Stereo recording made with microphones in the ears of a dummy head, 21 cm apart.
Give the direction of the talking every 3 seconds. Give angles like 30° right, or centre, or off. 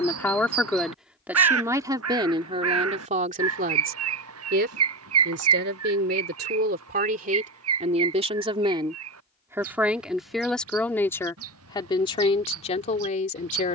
10° right, 40° right, 40° right, centre, 30° left.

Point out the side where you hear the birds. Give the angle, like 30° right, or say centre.
70° right.